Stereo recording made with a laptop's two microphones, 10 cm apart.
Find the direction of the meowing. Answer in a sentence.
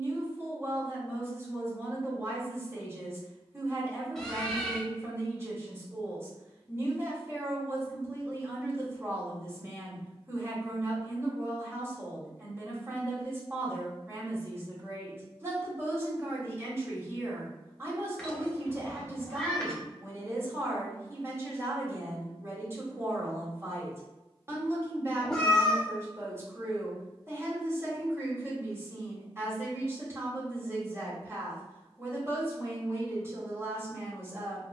You can hear the meowing in the centre.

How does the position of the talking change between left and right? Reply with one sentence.
In this clip you hear the talking stay in one place.